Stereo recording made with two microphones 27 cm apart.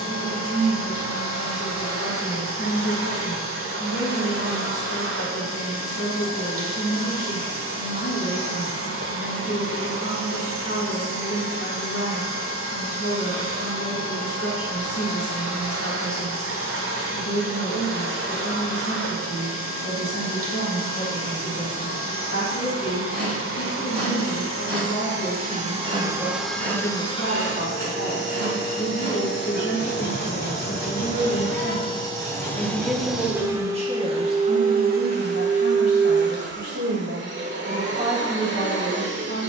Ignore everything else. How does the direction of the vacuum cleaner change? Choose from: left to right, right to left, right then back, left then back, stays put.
left then back.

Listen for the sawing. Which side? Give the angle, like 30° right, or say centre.
40° right.